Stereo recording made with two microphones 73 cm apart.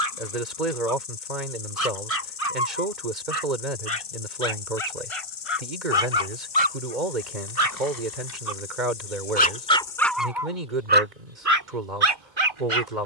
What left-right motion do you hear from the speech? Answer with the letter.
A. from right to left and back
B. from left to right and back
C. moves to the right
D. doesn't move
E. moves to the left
D.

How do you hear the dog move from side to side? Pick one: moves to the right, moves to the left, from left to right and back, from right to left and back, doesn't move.
moves to the right.